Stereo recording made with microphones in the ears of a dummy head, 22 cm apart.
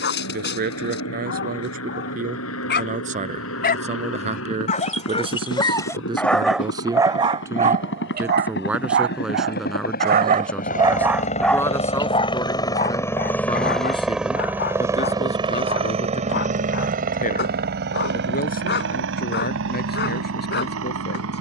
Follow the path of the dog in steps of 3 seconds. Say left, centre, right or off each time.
left, left, right, right, left, left, left.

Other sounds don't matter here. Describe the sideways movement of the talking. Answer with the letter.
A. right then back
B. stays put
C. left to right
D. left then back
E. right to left
E.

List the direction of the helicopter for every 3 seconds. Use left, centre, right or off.
left, left, left, left, centre, right, right.